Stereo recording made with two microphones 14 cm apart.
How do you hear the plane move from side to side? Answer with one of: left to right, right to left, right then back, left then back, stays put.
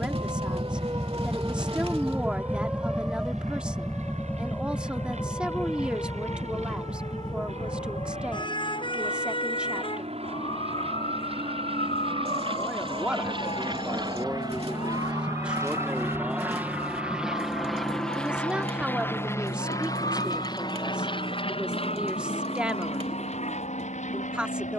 right to left.